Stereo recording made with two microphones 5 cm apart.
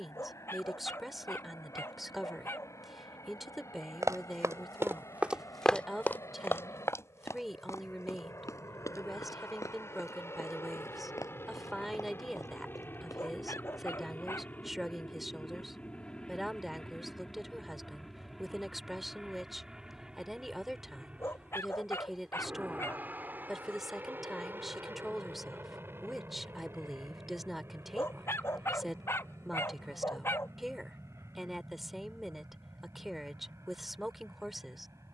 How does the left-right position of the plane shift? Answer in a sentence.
You can hear the plane move to the right.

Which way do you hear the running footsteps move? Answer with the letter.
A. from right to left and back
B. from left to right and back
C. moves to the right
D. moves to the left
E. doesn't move
D.